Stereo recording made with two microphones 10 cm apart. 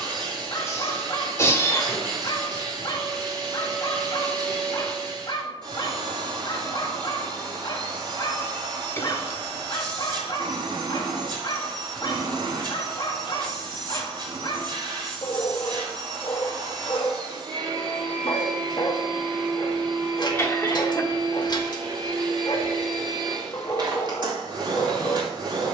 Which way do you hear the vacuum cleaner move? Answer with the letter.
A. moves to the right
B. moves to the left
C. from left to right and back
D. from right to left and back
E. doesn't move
E.